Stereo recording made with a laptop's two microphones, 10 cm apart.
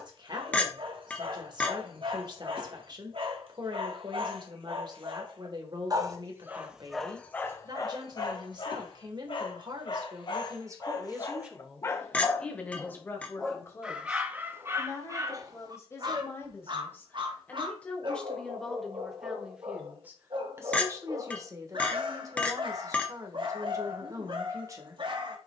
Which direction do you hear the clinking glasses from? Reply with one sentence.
In this clip you hear the clinking glasses in the centre.